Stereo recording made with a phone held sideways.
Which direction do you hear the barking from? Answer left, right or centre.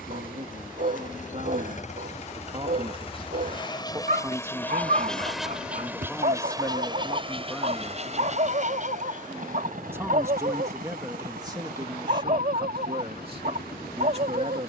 right.